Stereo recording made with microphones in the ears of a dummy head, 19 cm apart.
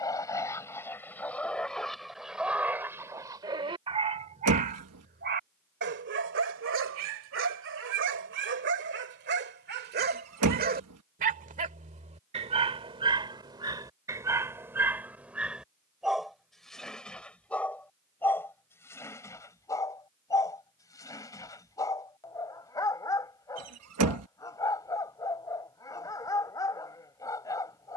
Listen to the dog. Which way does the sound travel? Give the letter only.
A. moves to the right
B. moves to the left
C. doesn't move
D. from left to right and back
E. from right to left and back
D.